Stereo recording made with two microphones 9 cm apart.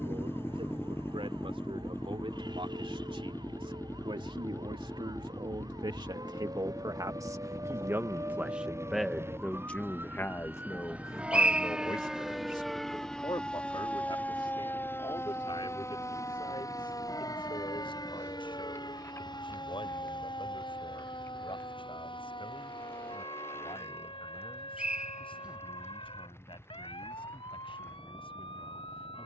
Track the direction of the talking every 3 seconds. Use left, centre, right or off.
right, right, right, left, left, left, left, left, left, left.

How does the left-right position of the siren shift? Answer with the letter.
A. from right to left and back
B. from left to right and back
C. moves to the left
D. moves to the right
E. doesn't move
C.